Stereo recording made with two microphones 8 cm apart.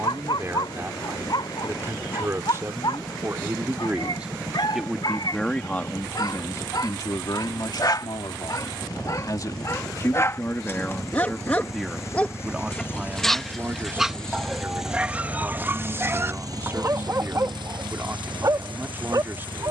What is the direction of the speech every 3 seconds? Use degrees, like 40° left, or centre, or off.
30° right, 10° right, 50° left, 20° left, 20° right, 30° right, 30° right.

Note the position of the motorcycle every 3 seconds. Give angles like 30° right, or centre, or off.
60° left, 60° left, 50° left, 40° left, 20° left, 40° right, 80° right.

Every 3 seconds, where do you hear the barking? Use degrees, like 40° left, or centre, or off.
70° left, 60° left, 50° left, 30° left, centre, 30° right, 50° right.